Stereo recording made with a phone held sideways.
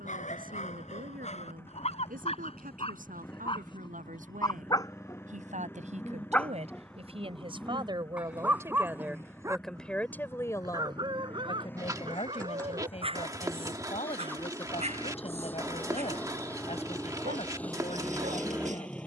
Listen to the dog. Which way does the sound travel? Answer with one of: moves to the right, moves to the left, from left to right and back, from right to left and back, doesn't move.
moves to the right.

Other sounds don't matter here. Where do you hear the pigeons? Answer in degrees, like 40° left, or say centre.
20° right.